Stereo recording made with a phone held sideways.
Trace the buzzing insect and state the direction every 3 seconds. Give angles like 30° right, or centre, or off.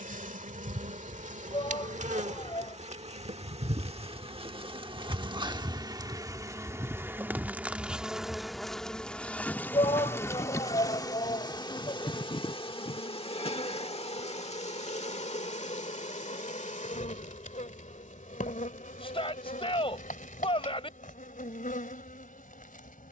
50° right, 40° right, 10° right, 20° left, 40° left, 50° left, 60° left, 60° left.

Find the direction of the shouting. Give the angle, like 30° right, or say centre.
40° left.